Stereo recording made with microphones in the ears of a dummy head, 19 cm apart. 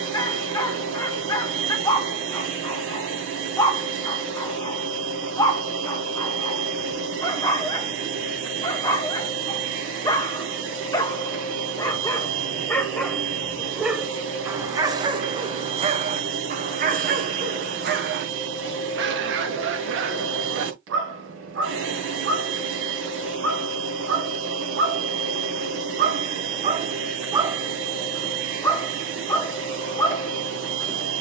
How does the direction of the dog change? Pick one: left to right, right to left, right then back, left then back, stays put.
right then back.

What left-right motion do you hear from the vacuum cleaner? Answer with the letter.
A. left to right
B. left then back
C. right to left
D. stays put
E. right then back
D.